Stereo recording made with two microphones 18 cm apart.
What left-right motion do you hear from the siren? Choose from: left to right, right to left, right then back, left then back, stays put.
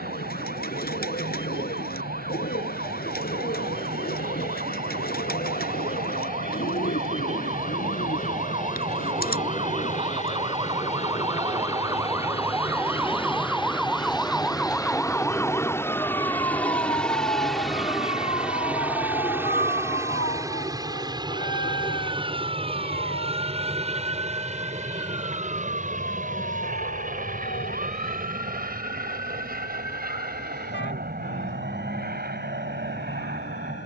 right to left.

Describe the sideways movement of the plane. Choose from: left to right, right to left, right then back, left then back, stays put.
left to right.